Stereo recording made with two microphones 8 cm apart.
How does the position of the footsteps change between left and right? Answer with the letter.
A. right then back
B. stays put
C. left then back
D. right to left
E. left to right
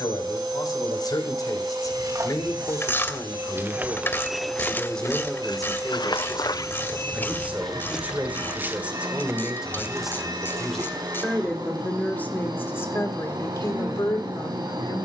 C.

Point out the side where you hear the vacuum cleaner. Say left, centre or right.
right.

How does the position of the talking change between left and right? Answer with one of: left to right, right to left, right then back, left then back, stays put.
right then back.